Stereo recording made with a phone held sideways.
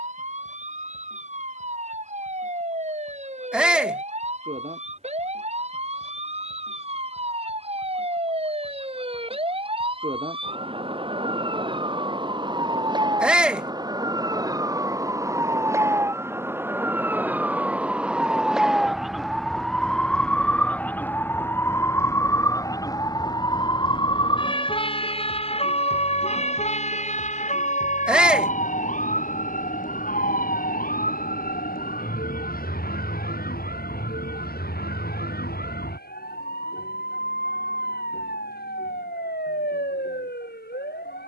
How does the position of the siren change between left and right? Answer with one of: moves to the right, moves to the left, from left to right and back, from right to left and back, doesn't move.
moves to the left.